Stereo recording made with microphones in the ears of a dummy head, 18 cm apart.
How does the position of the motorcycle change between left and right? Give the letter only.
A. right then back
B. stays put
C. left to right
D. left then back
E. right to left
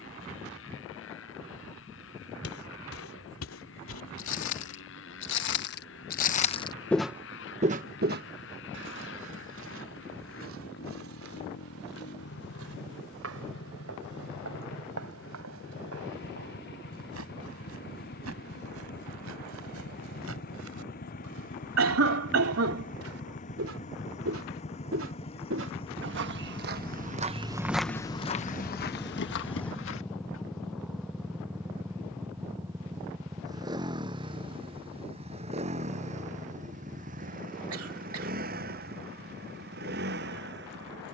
C.